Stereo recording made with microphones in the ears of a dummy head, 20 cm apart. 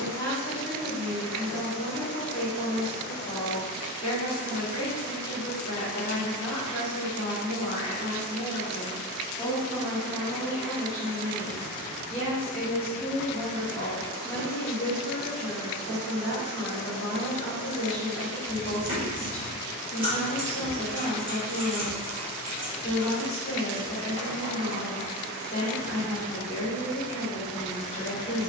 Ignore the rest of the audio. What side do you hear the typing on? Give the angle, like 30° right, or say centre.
20° right.